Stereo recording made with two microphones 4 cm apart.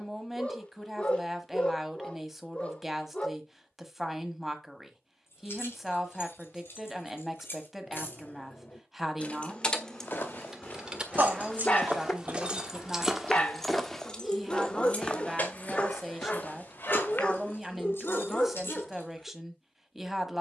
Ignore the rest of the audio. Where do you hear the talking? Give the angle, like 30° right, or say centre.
centre.